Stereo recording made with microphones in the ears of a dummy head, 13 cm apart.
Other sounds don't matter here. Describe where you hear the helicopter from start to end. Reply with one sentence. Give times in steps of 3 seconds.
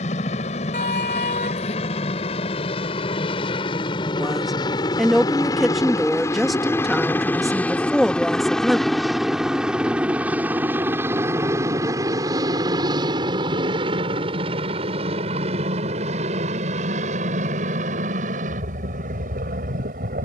You can hear the helicopter on the left from 0 s, in the centre from 6 s and on the right from 12 s.